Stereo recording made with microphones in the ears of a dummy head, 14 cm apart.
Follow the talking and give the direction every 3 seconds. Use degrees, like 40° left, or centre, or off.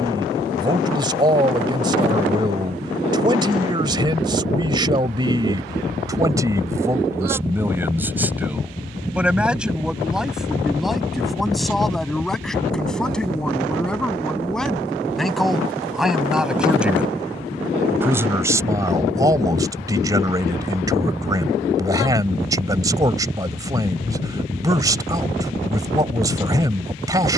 30° right, 30° right, 20° right, centre, centre, centre, 20° right, 20° right, 20° right.